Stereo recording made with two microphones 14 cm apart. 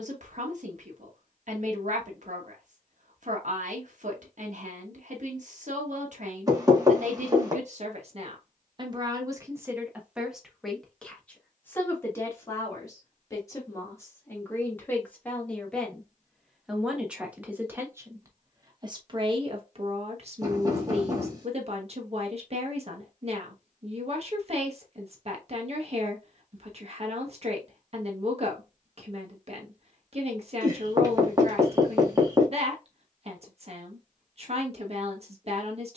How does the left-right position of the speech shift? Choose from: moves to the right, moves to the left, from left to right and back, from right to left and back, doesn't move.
from right to left and back.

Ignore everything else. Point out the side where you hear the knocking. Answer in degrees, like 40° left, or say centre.
30° right.